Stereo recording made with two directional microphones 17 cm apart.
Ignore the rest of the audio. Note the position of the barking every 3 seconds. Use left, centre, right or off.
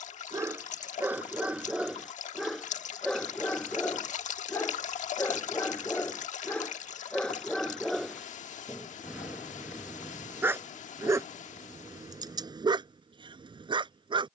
centre, centre, centre, centre, right.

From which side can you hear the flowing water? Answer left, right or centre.
left.